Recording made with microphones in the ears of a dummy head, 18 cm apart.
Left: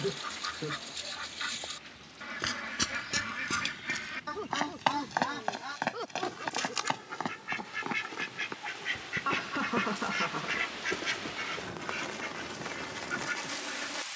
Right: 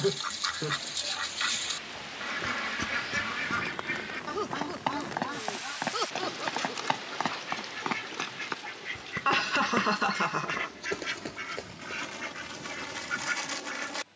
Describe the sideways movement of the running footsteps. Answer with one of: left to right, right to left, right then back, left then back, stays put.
left to right.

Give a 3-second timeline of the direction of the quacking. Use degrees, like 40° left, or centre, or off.
20° right, 10° left, 30° left, 20° left, 10° right.